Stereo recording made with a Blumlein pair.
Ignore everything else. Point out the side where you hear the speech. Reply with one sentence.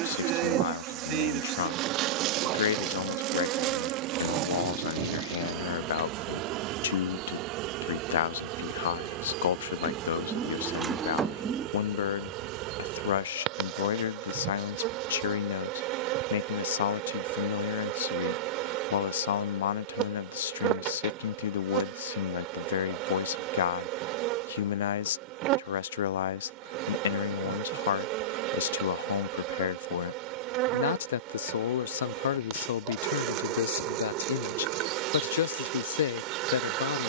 You can hear the speech on the left.